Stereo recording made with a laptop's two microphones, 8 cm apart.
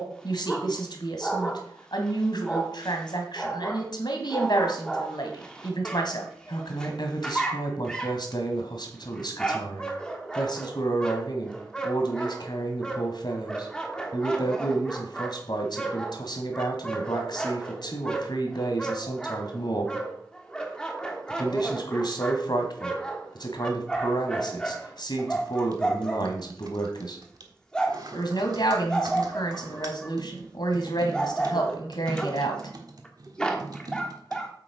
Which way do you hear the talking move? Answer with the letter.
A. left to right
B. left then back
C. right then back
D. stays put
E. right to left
D.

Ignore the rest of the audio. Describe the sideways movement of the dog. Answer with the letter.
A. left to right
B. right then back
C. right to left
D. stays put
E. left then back
D.